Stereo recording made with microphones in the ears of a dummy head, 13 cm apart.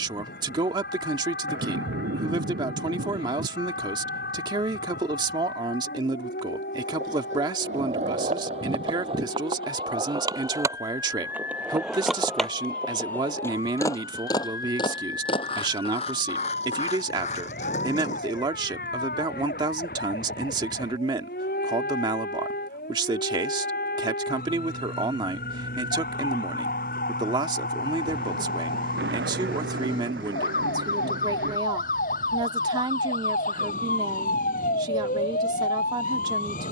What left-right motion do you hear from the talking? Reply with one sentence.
You can hear the talking stay put.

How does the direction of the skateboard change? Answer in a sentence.
You can hear the skateboard move to the left.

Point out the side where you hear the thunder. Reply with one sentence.
In this clip you hear the thunder on the right.